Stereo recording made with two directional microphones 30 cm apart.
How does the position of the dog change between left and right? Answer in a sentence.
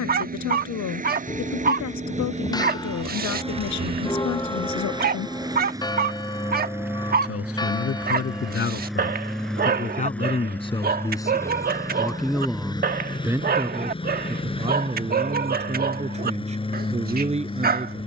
In this clip you hear the dog stay in one place.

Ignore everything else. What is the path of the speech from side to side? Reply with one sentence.
In this clip you hear the speech move from left to right.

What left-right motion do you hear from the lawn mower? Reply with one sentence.
You can hear the lawn mower travel towards the left.